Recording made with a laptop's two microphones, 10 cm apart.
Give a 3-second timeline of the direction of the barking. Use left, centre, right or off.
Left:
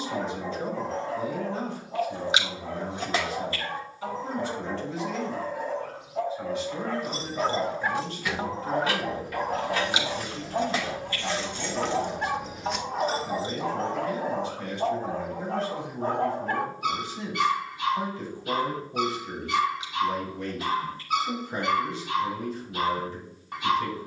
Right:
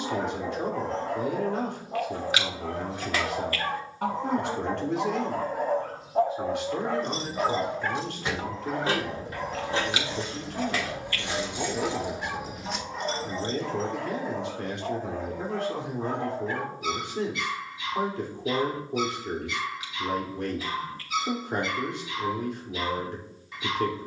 right, right, centre, left, left, left, left, left.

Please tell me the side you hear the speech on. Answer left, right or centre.
right.